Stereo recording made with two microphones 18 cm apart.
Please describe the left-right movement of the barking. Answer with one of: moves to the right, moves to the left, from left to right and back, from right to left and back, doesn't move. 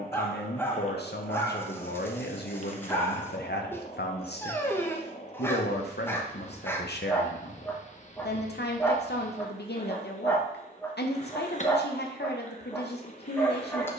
doesn't move.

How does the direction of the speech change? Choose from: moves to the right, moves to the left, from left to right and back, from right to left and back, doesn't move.
doesn't move.